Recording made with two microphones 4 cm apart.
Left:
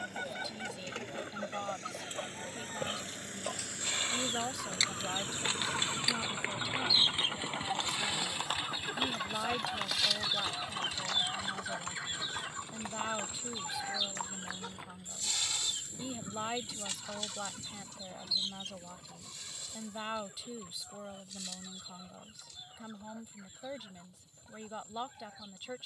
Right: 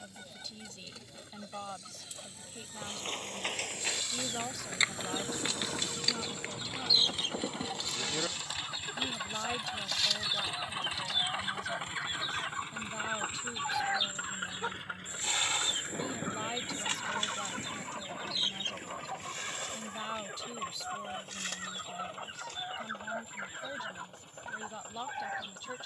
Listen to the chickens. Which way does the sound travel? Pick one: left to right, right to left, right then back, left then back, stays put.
left to right.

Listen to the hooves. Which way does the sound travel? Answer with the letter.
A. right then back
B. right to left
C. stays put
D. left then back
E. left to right
B.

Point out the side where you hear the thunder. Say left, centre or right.
right.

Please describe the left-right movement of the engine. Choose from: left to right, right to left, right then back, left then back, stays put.
left to right.